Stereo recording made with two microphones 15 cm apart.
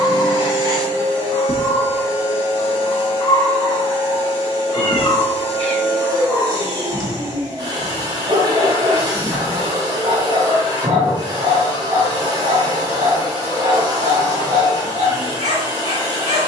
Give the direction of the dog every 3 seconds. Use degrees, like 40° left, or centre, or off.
40° left, 10° left, 30° right, 50° right, 50° right, 50° right.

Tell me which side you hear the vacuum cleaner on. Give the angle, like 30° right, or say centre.
30° right.